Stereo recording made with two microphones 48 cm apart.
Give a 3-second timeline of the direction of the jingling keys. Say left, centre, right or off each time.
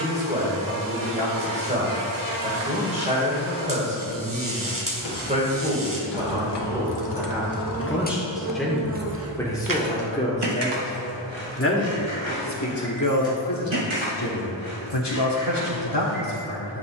off, left, left, right, right, right.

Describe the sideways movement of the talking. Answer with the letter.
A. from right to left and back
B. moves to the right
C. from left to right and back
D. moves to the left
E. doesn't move
D.